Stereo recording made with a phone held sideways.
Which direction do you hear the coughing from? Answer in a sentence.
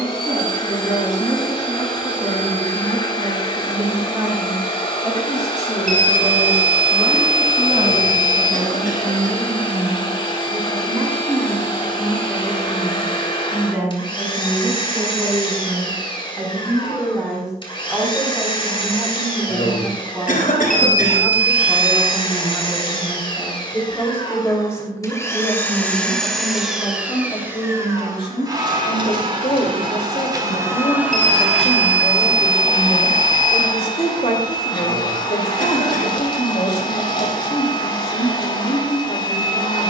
In this clip you hear the coughing on the left.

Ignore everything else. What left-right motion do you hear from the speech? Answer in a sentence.
You can hear the speech travel towards the left.